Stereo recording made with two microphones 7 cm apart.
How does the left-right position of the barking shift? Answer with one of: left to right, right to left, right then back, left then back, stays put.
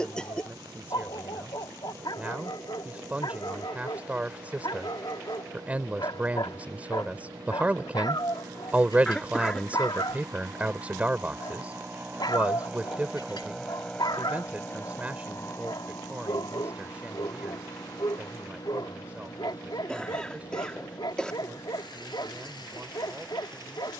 stays put.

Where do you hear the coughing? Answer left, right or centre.
centre.